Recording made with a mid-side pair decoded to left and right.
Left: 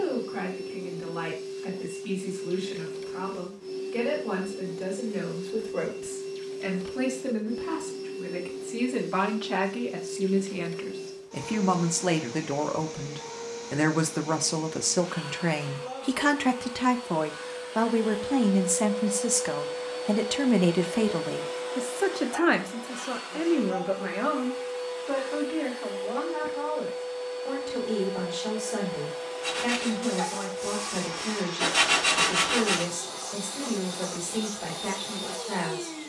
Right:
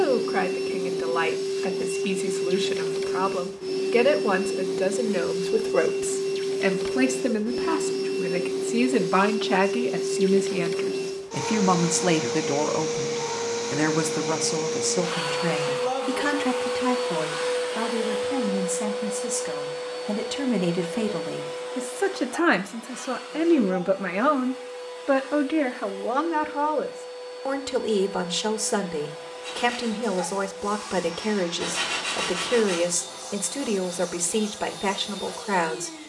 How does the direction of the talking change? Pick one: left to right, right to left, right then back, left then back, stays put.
left then back.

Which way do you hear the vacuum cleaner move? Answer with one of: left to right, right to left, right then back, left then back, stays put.
right to left.